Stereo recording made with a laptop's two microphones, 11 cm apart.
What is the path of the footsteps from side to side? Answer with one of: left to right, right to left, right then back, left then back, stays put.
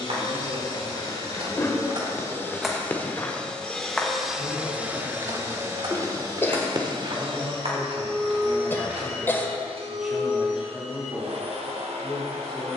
left then back.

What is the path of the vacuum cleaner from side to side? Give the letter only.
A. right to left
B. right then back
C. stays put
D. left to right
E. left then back
D.